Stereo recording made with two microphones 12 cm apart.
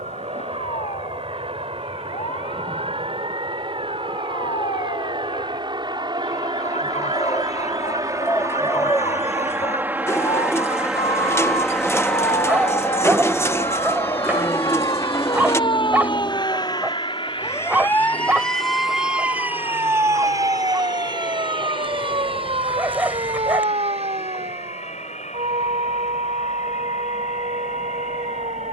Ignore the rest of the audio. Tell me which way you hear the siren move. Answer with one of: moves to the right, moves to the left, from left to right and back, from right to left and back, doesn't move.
moves to the right.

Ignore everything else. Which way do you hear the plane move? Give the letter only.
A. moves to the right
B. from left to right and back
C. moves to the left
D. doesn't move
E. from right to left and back
C.